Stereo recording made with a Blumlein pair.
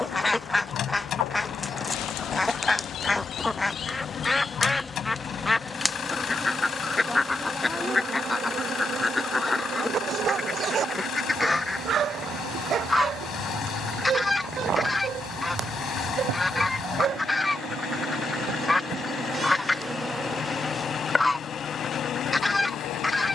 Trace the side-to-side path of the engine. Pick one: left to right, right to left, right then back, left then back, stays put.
stays put.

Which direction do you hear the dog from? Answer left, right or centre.
right.